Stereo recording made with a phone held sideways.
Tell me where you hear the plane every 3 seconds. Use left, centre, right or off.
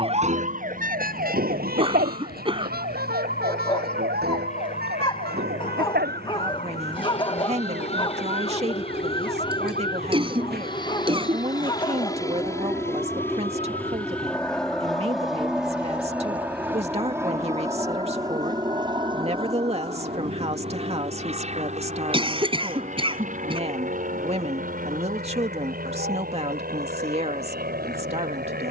left, left, left, left, centre, centre, right, right, right, right.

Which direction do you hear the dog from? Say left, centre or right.
left.